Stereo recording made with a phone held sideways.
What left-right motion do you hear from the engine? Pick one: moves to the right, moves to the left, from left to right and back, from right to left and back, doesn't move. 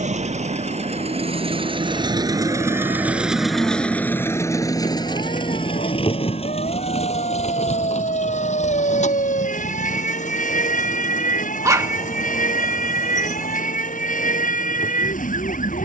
moves to the left.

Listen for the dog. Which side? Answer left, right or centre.
right.